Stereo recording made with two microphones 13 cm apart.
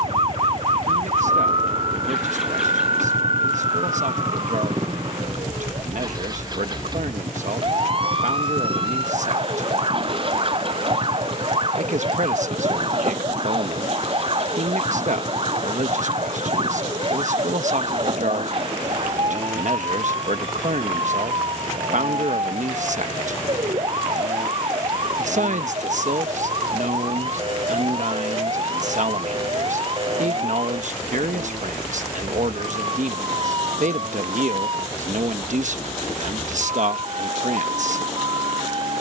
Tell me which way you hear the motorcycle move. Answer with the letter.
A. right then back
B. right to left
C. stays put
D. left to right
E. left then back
D.